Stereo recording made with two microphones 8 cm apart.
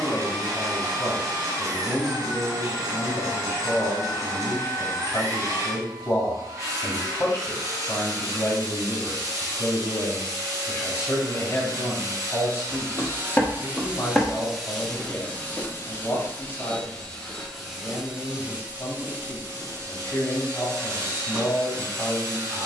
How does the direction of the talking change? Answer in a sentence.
You can hear the talking stay in one place.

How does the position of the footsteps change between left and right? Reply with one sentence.
You can hear the footsteps go right and come back.